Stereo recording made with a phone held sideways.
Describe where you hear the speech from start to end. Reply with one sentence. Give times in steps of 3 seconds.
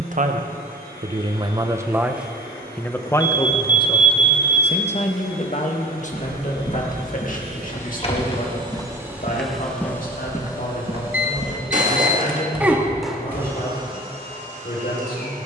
In this clip you hear the speech on the right from 0 s and on the left from 3 s.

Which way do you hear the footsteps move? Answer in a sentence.
You can hear the footsteps move from left to right.